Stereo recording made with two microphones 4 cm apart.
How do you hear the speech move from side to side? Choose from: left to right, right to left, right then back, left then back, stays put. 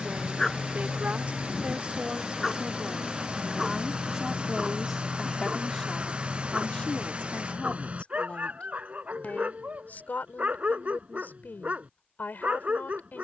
right to left.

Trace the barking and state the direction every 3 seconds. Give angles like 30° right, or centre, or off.
centre, 10° right, 30° right, 40° right, 40° right.